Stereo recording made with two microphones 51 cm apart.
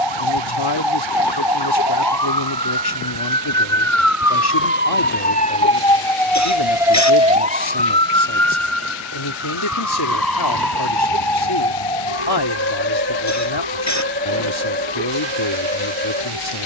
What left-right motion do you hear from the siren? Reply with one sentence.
You can hear the siren go from the left side to the right.